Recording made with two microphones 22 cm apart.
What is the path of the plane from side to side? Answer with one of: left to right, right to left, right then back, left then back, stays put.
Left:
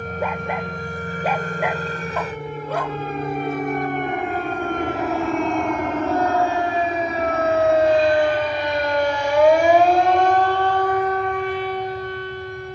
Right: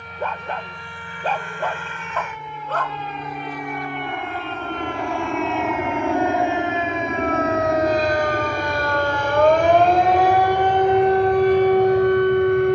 left to right.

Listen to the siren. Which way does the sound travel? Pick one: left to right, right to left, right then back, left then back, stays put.
left to right.